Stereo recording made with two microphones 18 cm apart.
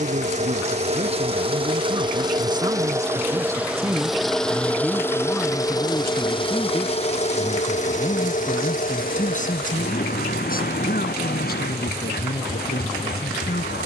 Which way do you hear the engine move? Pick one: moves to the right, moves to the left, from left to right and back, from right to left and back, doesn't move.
moves to the left.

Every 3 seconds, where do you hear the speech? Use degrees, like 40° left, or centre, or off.
30° right, centre, 30° left, 50° left, 60° left.